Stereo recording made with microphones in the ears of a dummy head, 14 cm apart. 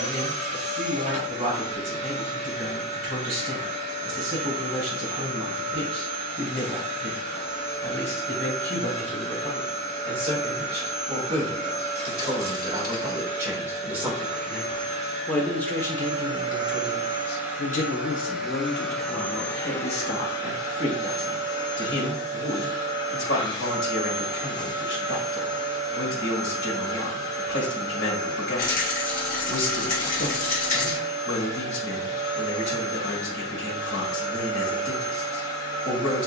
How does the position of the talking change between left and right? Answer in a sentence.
In this clip you hear the talking go from the right side to the left.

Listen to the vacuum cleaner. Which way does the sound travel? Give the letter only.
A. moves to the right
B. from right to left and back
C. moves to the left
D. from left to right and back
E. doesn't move
C.